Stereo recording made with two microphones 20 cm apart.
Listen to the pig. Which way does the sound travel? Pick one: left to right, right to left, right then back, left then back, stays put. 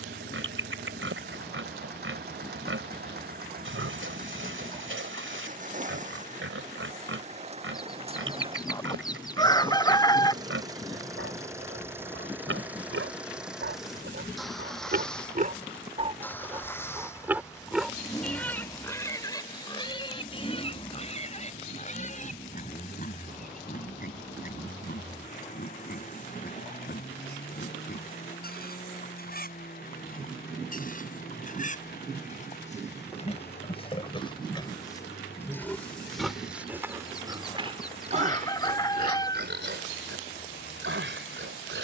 left then back.